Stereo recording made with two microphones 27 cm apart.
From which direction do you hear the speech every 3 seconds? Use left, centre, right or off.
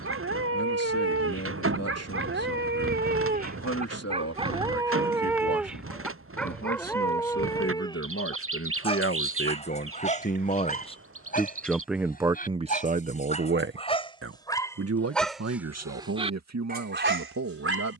left, left, left, left, right, right.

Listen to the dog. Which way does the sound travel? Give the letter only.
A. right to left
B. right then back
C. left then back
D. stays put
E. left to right
C.